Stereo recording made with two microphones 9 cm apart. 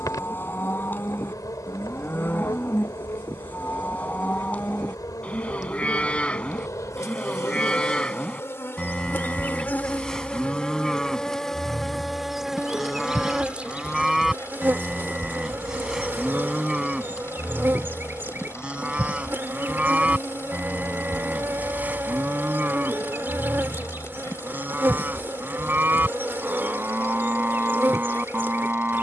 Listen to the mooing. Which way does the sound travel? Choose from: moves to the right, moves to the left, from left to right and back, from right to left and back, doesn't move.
moves to the right.